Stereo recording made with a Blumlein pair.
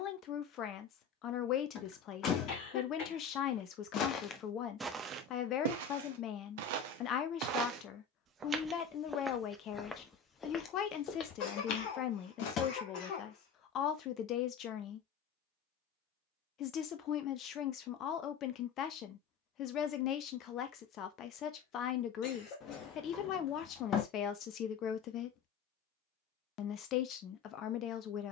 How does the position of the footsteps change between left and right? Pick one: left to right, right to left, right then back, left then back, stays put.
right then back.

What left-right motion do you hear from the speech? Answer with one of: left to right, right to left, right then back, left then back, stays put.
stays put.